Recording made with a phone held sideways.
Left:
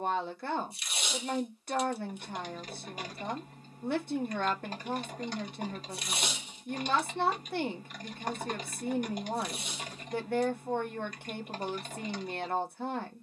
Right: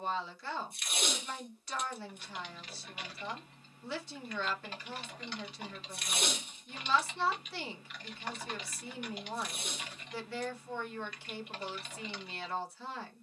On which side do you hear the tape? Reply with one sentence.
In this clip you hear the tape on the right.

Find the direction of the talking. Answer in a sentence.
You can hear the talking on the left.